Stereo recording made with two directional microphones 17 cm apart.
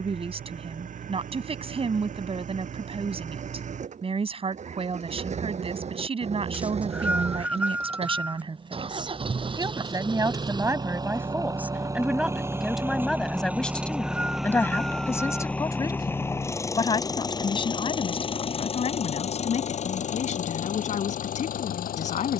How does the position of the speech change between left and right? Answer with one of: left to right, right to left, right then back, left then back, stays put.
right to left.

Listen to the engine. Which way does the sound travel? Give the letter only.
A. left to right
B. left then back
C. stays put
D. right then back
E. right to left
E.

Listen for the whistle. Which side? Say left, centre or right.
centre.